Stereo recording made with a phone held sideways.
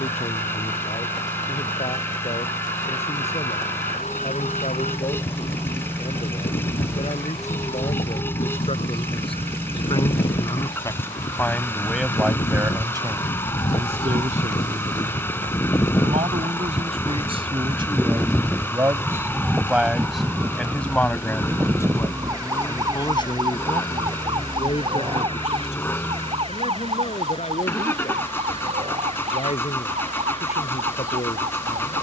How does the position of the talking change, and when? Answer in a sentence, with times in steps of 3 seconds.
You can hear the talking on the left from 0 s, on the right from 12 s, in the centre from 18 s and on the left from 21 s.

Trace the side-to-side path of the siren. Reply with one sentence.
You can hear the siren travel towards the right.